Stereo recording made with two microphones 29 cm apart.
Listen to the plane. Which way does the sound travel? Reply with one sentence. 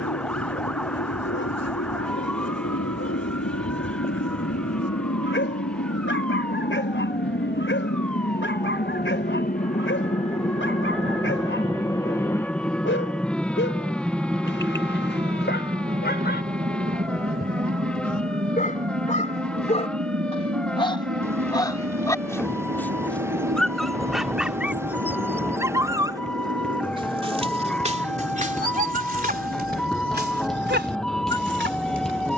You can hear the plane travel towards the right.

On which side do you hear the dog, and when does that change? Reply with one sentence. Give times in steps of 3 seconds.
You can hear the dog on the left from 0 s, in the centre from 21 s and on the right from 27 s.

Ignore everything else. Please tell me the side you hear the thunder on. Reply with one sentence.
In this clip you hear the thunder in the centre.